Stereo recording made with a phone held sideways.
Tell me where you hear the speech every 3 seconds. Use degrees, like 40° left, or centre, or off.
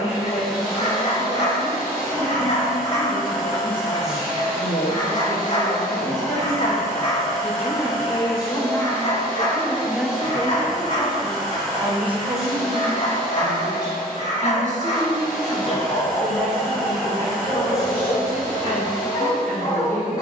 70° left, 60° left, 40° left, 10° right, 50° right, 60° right, 70° right.